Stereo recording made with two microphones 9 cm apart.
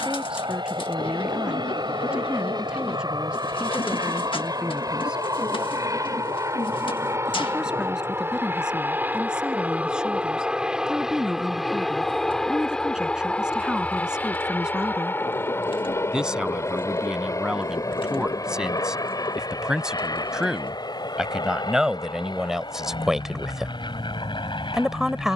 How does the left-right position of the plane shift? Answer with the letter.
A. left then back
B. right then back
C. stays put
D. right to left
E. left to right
D.